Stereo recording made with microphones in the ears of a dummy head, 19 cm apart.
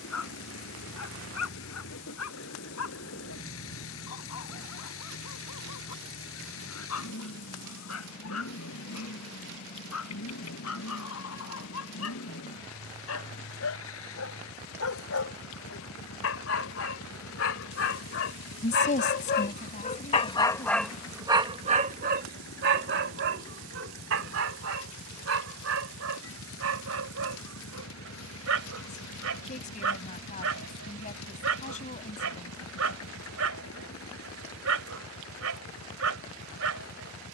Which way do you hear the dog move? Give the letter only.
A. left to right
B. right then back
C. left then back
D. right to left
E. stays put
A.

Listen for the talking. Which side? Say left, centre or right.
left.